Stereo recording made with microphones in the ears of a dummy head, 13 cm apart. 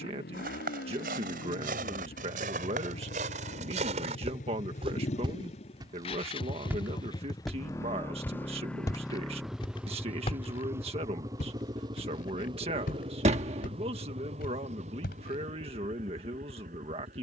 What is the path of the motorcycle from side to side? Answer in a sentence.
In this clip you hear the motorcycle move from left to right.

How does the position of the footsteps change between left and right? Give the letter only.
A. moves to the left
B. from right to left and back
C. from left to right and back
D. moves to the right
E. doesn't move
A.